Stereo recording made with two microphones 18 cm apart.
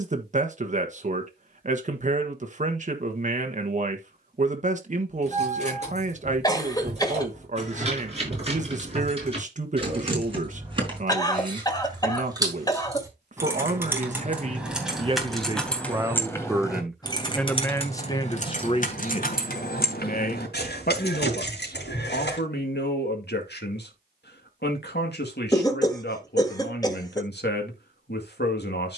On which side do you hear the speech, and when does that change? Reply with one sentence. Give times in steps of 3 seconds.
You can hear the speech on the right from 0 s, in the centre from 15 s and on the left from 18 s.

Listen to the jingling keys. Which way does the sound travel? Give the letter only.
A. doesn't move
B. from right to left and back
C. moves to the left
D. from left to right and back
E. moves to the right
C.